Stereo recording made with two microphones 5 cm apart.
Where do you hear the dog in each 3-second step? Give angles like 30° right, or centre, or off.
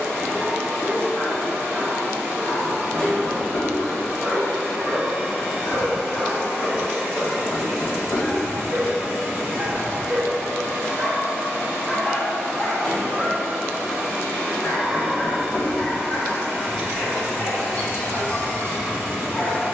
40° left, 40° left, 10° left, 10° right, 30° left, 40° left, 40° left.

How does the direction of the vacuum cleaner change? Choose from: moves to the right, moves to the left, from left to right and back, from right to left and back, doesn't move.
doesn't move.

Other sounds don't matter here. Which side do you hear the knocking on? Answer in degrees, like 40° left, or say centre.
20° left.